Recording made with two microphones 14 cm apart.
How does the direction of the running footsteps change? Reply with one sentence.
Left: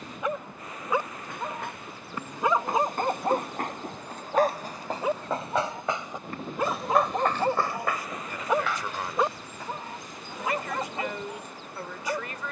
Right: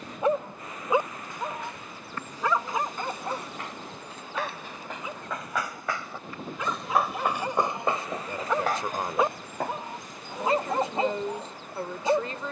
You can hear the running footsteps move to the right.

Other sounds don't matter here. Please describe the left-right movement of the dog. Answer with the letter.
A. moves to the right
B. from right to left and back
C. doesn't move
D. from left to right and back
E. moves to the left
B.